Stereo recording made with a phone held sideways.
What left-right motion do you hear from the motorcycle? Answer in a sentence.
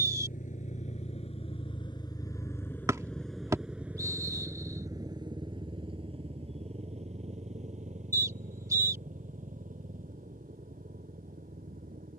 You can hear the motorcycle move to the right.